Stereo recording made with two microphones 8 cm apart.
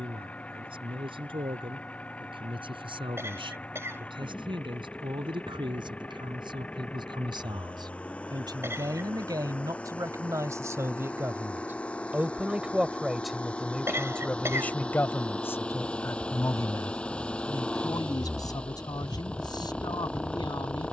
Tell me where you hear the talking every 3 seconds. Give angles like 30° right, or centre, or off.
80° right, 70° right, 60° right, 40° right, centre, 30° left, 50° left.